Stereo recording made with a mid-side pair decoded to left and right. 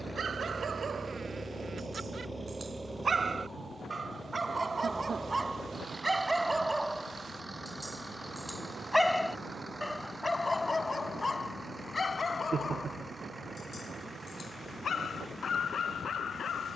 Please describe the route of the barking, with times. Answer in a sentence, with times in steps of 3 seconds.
In this clip you hear the barking on the right from 0 s, in the centre from 6 s and on the left from 9 s.